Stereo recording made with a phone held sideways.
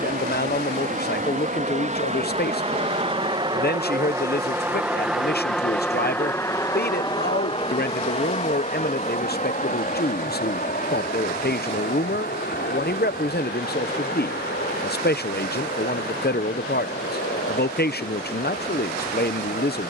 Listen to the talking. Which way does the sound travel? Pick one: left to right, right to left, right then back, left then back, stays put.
stays put.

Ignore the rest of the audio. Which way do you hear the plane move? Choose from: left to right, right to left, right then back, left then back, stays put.
right to left.